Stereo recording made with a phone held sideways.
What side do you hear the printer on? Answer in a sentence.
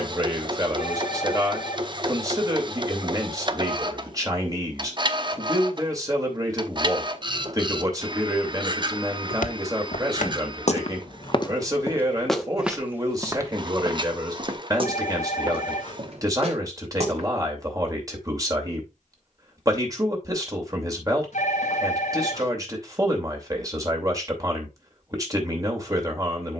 You can hear the printer on the right.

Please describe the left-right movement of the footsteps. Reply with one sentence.
You can hear the footsteps go from the left side to the right.